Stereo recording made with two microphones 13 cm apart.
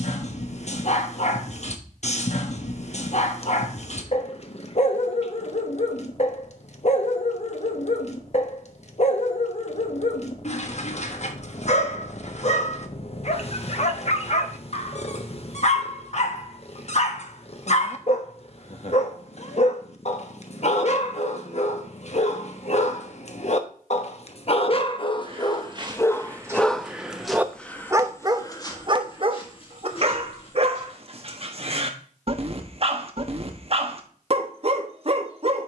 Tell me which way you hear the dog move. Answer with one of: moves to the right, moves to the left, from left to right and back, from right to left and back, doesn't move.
moves to the right.